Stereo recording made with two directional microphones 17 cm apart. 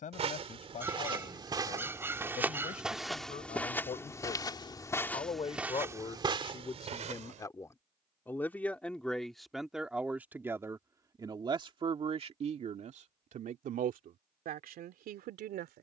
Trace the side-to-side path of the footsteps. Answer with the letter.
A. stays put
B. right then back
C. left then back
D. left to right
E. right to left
C.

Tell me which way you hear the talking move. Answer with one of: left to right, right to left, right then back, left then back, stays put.
left to right.